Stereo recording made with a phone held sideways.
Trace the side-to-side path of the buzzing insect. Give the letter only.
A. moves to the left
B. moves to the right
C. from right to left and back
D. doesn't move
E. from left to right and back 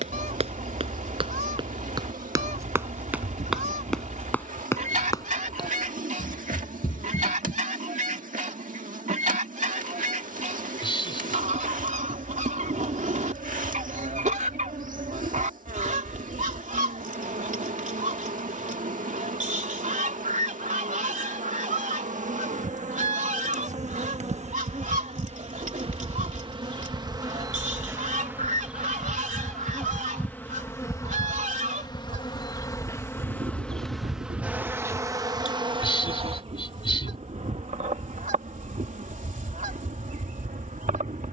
C.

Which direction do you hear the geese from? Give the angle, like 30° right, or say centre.
60° right.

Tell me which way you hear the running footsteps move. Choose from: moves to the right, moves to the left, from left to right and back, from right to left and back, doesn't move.
moves to the left.